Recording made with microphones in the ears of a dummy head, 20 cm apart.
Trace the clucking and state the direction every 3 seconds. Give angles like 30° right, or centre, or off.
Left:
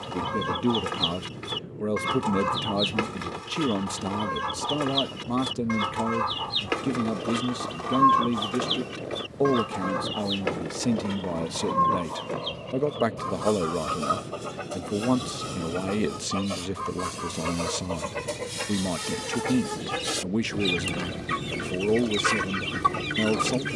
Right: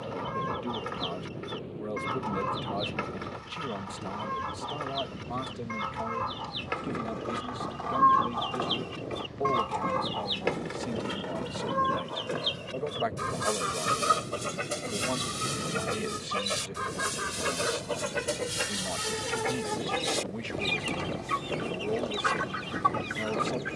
60° left, 60° left, 40° left, centre, 20° right, 20° right, centre, 30° left.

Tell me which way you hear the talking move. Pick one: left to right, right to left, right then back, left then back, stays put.
stays put.